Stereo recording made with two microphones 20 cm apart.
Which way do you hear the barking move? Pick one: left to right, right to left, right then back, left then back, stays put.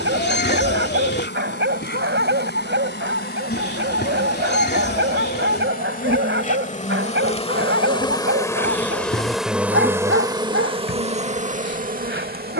stays put.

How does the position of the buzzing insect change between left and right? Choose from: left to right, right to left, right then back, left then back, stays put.
left to right.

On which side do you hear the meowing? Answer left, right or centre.
left.